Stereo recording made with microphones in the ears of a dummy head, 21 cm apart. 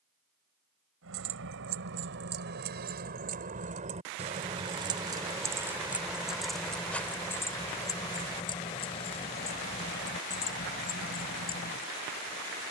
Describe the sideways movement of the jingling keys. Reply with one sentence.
In this clip you hear the jingling keys move to the left.